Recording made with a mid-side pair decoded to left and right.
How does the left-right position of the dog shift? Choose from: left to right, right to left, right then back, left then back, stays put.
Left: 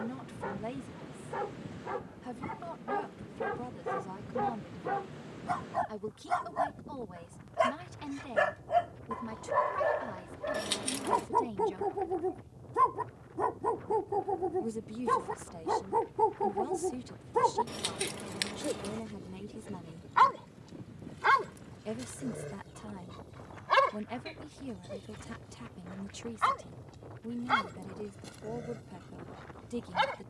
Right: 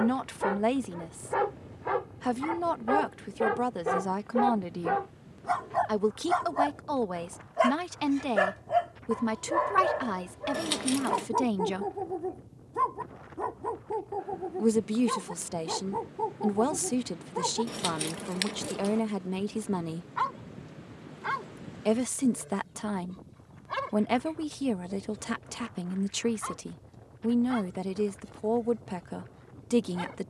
right to left.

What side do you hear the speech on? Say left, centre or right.
right.